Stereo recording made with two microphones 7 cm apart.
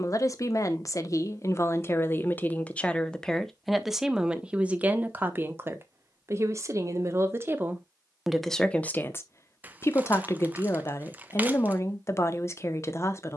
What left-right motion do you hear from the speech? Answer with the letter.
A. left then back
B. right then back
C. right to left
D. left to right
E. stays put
B.